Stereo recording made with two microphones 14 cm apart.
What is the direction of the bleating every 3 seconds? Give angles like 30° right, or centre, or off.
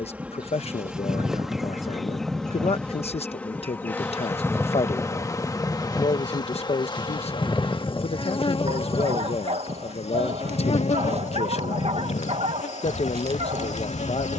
20° right, centre, 20° left, 50° left, 60° left.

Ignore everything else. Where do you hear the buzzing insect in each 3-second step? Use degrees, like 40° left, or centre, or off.
centre, 20° left, 40° left, 50° left, 60° left.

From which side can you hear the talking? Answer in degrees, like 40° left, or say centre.
50° left.